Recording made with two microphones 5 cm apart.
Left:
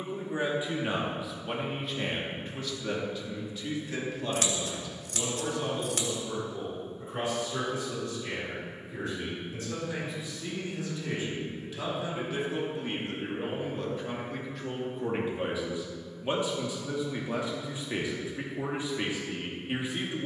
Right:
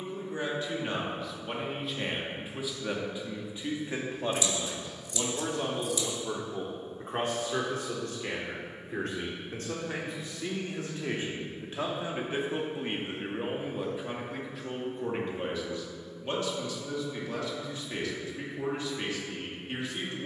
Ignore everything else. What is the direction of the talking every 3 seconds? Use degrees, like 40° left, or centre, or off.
centre, 30° right, 50° right, 50° right, 20° right, 10° left, 20° left.